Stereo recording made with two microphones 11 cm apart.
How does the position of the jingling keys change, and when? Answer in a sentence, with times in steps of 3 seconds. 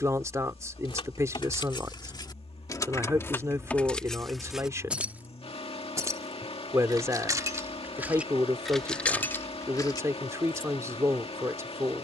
In this clip you hear the jingling keys on the left from 0 s, in the centre from 3 s, on the right from 6 s and on the left from 9 s.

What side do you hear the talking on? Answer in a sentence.
In this clip you hear the talking on the right.